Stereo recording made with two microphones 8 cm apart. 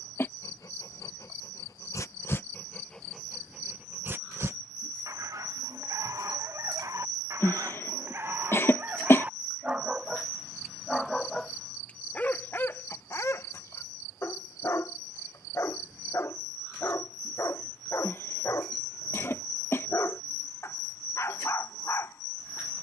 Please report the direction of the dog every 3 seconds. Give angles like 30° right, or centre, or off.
40° left, 30° right, 40° right, 10° right, 30° left, 40° left, 40° left, 40° left.